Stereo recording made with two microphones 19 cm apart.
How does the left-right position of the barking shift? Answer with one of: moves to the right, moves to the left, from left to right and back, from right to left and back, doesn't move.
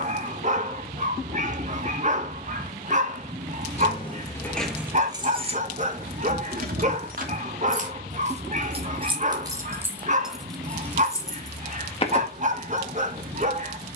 doesn't move.